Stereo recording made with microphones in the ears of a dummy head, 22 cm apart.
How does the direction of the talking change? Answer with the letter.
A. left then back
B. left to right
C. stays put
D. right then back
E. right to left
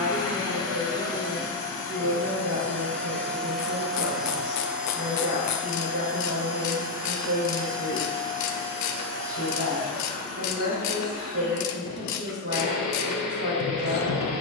C.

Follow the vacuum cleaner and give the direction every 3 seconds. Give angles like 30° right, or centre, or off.
10° left, centre, 20° right, 30° right, 30° right.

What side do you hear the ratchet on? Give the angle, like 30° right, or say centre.
70° left.